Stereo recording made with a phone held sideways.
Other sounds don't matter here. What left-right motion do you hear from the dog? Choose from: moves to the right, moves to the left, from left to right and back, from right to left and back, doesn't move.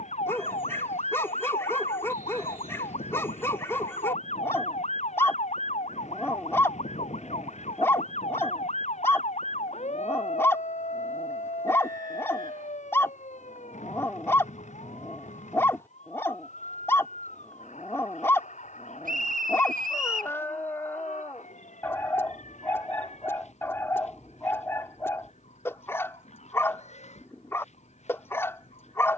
doesn't move.